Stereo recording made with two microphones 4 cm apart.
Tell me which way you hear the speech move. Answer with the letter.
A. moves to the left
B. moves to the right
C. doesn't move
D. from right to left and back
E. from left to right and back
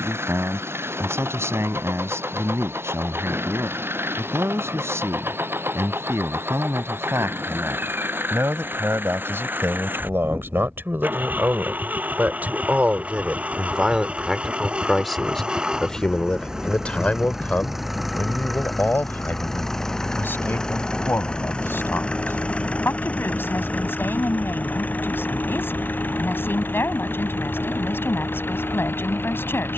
A.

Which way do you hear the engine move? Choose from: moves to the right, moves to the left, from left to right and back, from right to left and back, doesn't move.
moves to the left.